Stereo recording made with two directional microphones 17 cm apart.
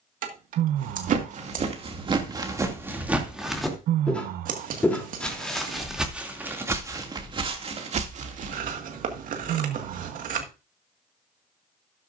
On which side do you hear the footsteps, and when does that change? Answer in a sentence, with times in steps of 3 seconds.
In this clip you hear the footsteps on the right from 0 s, in the centre from 3 s, on the right from 6 s and not at all from 9 s.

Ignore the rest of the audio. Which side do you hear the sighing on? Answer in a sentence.
You can hear the sighing on the right.